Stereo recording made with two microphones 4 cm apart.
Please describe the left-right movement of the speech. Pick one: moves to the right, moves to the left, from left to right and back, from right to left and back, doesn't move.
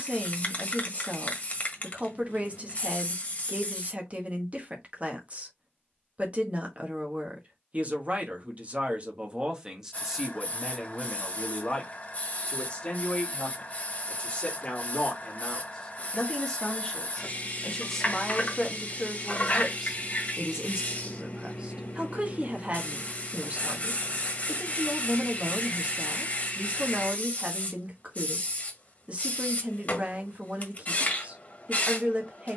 from right to left and back.